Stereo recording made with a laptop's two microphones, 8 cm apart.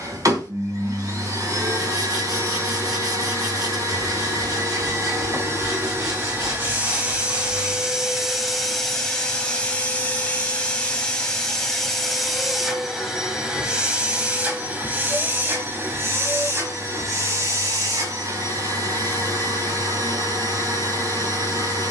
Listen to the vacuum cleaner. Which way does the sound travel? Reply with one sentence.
In this clip you hear the vacuum cleaner move from right to left and back again.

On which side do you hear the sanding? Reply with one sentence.
In this clip you hear the sanding on the right.